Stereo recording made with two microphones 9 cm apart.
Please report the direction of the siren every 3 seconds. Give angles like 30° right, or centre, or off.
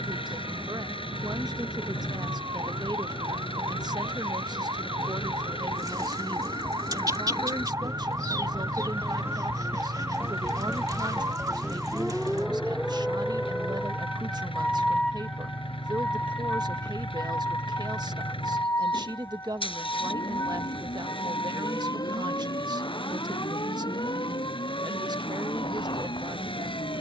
60° right, 50° right, 30° right, 20° right, centre, 20° left, 30° left, 40° left, 50° left.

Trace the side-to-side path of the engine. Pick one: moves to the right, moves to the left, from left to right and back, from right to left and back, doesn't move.
doesn't move.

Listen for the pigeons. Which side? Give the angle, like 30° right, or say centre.
40° right.